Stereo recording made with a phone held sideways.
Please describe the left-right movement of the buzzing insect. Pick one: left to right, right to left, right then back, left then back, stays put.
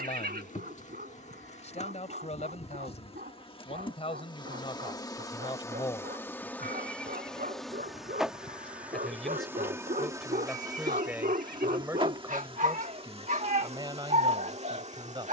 left to right.